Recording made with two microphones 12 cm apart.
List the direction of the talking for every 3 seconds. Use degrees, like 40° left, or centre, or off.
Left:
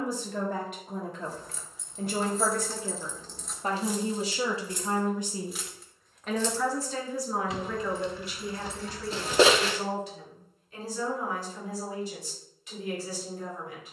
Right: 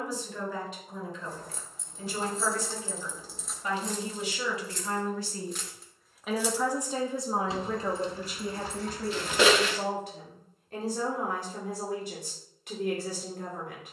60° left, 30° left, 30° right, 60° right, 60° right.